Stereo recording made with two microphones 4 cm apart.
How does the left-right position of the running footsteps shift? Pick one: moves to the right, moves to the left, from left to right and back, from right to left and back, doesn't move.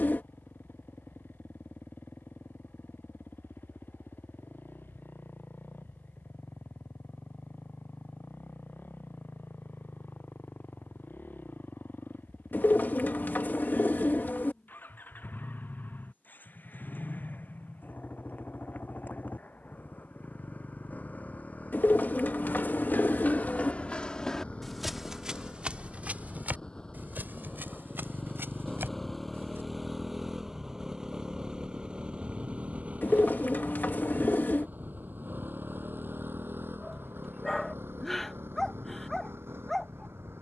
moves to the right.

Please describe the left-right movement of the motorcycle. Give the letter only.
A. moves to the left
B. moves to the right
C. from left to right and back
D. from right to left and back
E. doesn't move
B.